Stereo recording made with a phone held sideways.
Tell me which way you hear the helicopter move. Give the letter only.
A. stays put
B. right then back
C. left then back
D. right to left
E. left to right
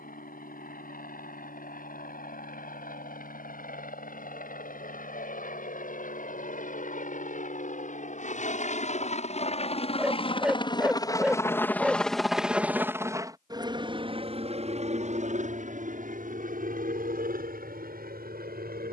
E.